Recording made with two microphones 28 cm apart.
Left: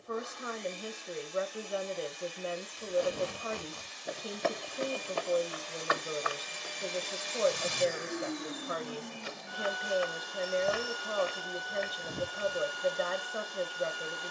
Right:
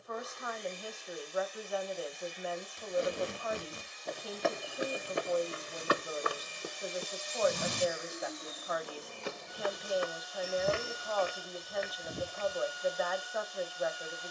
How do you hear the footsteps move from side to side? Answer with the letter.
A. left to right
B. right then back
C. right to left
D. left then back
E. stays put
B.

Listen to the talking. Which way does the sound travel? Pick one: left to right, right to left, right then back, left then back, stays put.
stays put.